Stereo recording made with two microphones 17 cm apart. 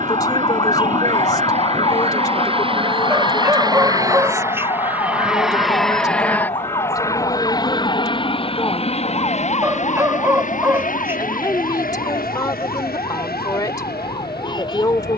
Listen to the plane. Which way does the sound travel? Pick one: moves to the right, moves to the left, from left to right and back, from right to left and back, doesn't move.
moves to the left.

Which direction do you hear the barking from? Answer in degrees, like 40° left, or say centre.
10° right.